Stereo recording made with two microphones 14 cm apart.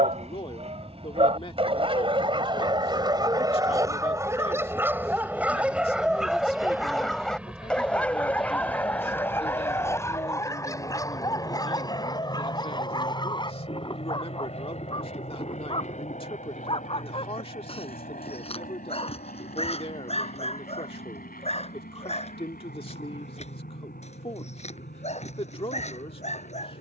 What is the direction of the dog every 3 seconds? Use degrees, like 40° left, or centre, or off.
40° right, 20° right, centre, 20° left, 30° left, 40° left, 50° left, 50° left, 50° left.